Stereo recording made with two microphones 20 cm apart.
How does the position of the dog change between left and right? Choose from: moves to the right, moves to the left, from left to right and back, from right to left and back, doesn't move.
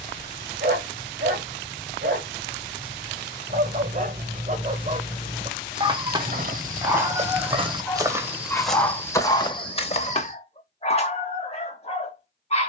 moves to the left.